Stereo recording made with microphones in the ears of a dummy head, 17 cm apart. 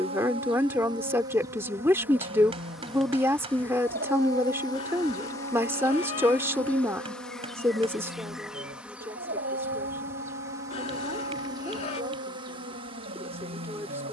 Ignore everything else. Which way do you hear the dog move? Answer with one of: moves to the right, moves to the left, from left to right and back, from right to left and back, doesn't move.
doesn't move.